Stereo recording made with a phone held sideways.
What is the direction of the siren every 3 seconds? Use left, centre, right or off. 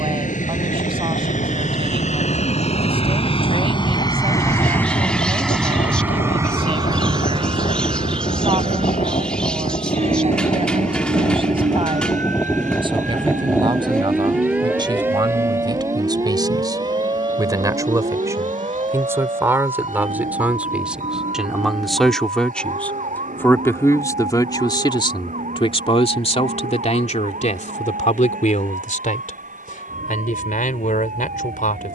left, left, left, left, centre, right, right, right, right, right, right.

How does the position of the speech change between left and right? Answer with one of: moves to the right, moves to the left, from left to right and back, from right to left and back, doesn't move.
moves to the left.